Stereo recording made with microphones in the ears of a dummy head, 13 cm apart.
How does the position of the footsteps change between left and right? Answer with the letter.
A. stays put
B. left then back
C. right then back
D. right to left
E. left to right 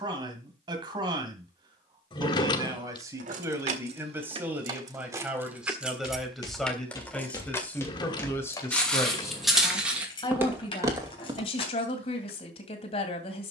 E.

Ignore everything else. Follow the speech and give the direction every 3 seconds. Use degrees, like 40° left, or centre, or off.
30° right, 10° right, 10° left, 30° left, 40° left.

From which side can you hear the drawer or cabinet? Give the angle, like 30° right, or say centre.
30° left.